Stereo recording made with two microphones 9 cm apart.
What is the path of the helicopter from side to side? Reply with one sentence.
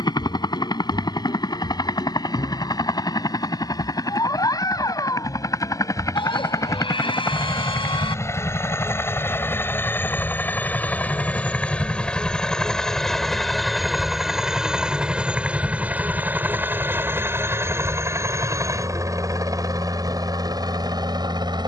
You can hear the helicopter travel towards the right.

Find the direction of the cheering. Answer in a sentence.
You can hear the cheering on the left.